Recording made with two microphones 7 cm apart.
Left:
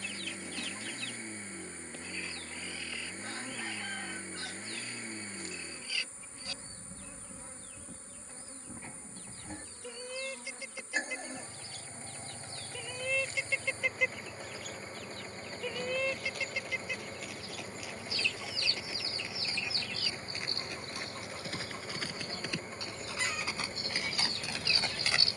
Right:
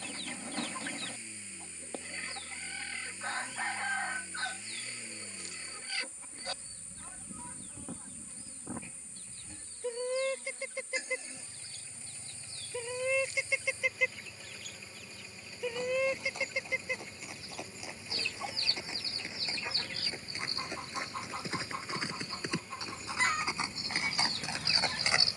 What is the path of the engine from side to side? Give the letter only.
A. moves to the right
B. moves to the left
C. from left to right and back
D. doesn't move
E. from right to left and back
D.